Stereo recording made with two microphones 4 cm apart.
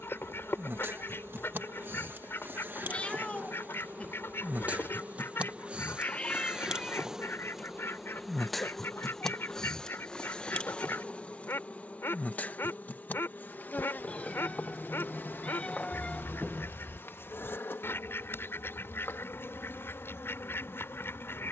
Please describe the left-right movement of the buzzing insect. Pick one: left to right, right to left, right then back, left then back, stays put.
right to left.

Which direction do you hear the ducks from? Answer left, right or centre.
left.